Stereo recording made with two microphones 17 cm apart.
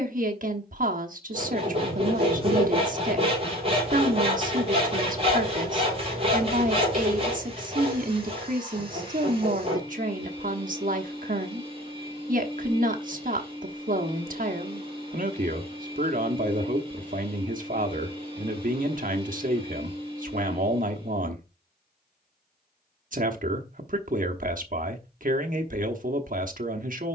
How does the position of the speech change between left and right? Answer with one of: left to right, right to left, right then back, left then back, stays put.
stays put.